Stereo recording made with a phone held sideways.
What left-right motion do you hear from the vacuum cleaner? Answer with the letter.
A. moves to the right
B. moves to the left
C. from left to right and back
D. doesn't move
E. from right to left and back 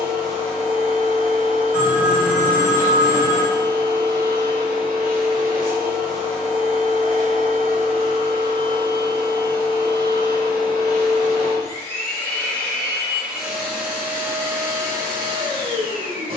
A.